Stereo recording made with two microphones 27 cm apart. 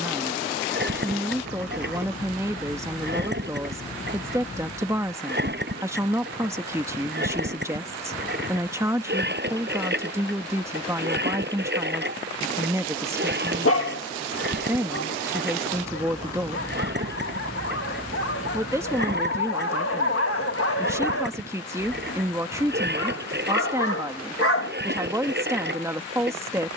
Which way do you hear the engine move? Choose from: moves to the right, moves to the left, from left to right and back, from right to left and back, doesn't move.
doesn't move.